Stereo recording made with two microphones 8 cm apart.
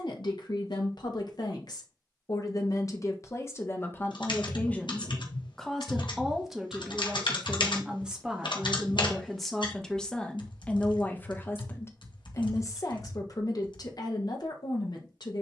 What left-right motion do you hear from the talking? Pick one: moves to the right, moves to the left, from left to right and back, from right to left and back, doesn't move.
from left to right and back.